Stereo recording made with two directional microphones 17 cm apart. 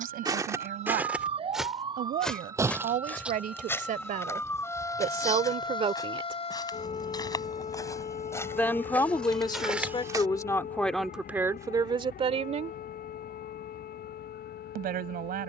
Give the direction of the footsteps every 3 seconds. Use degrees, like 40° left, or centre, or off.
10° right, 20° left, 20° left, centre, off.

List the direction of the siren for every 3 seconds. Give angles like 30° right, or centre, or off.
30° right, 10° left, 40° left, 50° left, 60° left.